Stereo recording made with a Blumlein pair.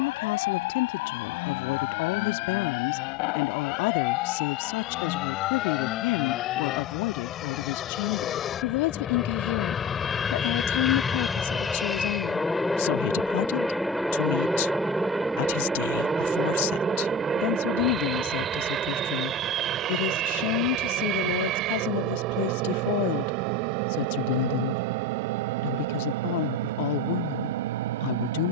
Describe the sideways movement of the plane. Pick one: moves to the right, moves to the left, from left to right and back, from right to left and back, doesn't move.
moves to the right.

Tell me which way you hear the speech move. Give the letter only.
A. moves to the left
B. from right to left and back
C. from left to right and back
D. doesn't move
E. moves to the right
D.